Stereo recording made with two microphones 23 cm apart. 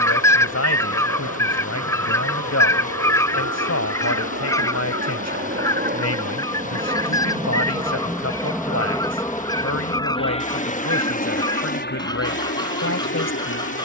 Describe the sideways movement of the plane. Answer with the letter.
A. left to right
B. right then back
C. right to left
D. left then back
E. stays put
C.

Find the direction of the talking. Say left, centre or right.
left.